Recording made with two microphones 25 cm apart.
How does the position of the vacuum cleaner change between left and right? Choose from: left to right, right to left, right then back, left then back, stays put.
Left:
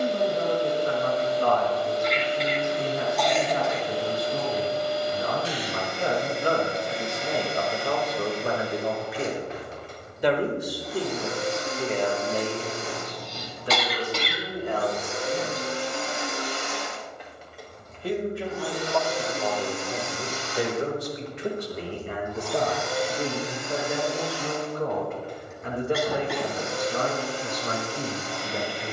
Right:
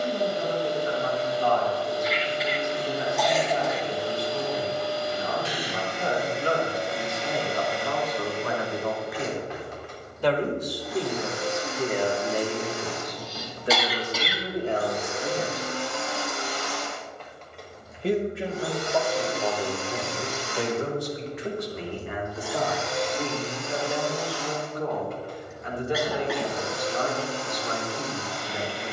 right then back.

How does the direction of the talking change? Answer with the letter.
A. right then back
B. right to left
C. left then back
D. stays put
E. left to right
A.